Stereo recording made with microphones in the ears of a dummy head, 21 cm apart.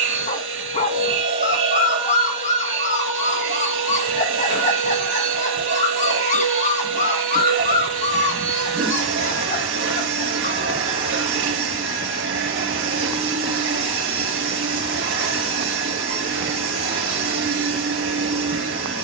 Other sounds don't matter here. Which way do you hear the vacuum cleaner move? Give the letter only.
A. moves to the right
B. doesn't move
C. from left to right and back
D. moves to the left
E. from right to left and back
B.